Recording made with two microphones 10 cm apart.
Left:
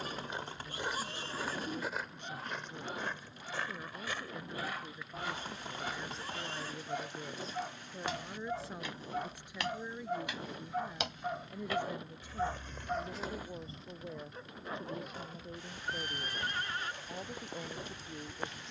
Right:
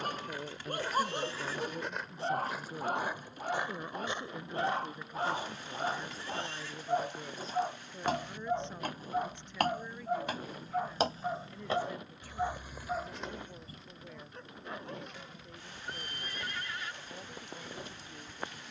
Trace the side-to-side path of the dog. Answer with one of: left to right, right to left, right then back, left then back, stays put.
right to left.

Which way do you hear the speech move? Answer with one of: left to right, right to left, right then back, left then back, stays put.
right to left.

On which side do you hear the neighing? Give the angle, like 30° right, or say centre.
40° left.